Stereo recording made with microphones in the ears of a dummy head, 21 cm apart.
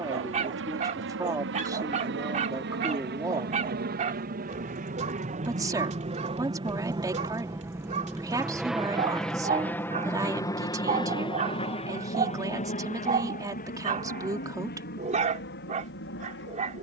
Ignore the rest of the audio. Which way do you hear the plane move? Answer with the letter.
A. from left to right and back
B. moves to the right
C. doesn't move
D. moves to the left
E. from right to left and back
D.